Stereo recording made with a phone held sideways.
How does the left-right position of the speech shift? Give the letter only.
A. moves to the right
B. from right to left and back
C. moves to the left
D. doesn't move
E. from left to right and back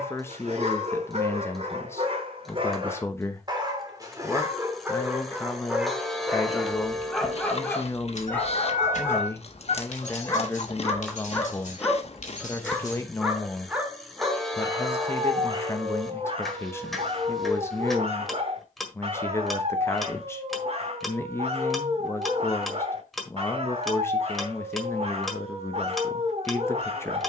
D.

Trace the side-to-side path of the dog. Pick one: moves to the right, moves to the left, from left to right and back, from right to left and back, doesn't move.
from right to left and back.